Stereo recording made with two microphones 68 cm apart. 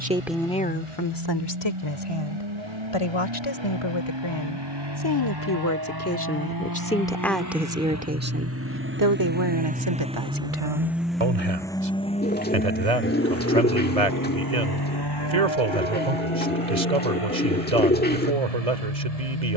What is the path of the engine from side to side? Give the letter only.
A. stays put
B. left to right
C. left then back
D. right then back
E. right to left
E.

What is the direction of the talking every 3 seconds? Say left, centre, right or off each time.
left, left, centre, right, right, right, right.